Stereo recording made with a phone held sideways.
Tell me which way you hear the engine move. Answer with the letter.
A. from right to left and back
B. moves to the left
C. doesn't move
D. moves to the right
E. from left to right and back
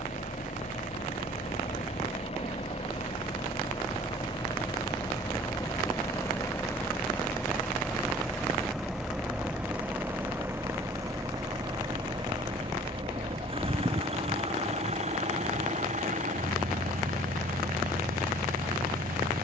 D.